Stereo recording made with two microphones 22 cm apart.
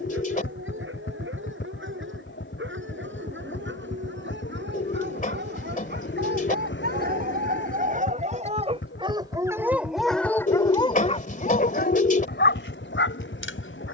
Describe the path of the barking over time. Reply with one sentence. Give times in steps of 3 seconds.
In this clip you hear the barking on the right from 0 s, in the centre from 9 s and on the left from 12 s.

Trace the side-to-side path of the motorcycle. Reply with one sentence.
In this clip you hear the motorcycle stay in one place.